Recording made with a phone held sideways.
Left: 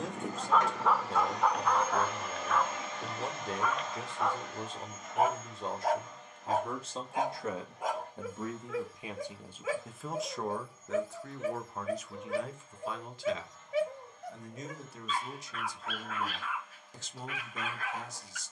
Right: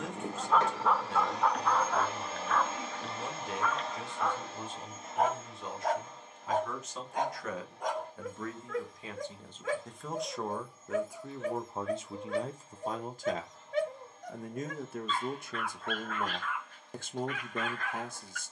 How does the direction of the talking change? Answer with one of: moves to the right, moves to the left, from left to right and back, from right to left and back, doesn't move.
moves to the right.